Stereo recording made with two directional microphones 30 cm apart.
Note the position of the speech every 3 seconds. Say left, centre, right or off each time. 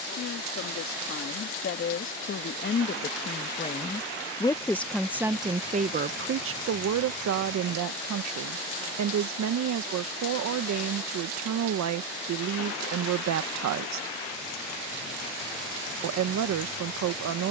left, centre, right, right, right, right.